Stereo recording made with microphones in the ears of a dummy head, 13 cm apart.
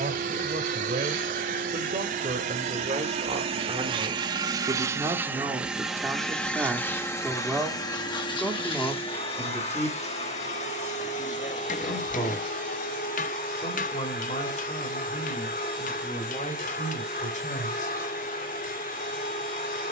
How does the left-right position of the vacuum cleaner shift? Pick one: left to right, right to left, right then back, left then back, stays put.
right to left.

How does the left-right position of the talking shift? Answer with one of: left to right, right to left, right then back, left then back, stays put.
right to left.